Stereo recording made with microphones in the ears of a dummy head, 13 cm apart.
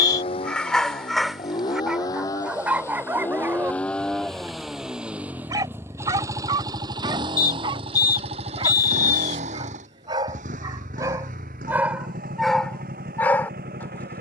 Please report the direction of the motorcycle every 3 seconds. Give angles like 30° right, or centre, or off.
30° left, centre, 30° right, 60° right, 70° right.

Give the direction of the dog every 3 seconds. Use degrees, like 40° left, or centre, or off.
centre, 20° right, 30° right, 30° right, 10° left.